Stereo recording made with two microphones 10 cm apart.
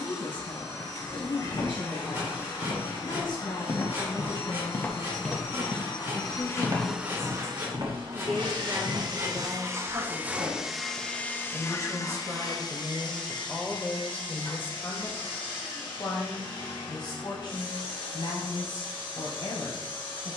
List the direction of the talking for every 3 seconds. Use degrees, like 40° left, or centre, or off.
60° left, 60° left, 20° left, 40° right, centre, 50° left, 60° left.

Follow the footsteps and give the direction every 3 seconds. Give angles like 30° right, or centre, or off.
60° left, 30° left, 50° right, 70° right, off, off, off.